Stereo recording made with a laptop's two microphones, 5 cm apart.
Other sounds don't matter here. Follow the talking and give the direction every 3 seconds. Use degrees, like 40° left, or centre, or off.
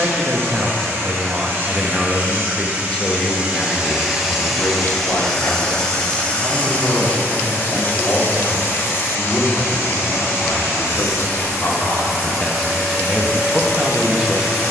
10° right, 40° left, 70° left, 60° left, centre.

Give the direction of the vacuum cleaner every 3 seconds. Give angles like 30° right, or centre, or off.
40° right, centre, 40° left, 60° left, 70° left.